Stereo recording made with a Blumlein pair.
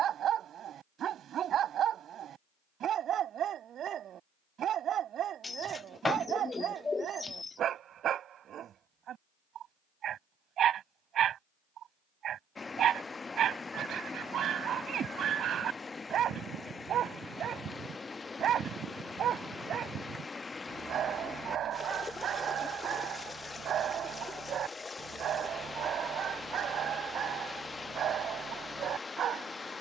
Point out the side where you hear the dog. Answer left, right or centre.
right.